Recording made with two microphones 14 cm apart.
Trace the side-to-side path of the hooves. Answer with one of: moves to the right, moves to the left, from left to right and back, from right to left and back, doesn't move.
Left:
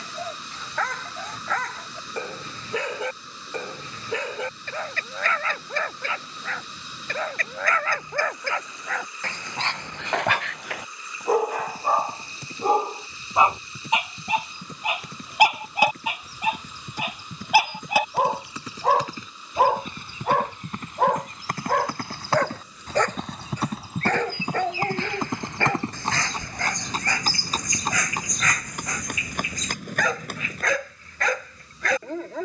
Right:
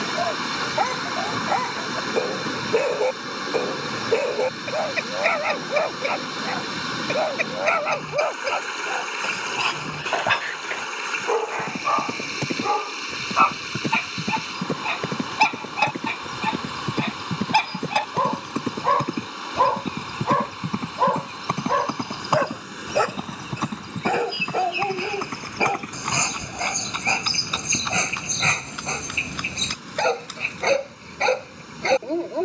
moves to the left.